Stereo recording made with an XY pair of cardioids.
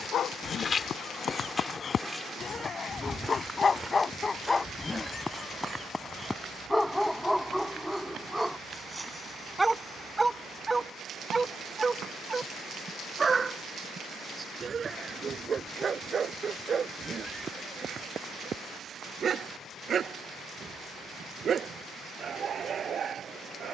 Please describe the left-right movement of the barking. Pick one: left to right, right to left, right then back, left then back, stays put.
left to right.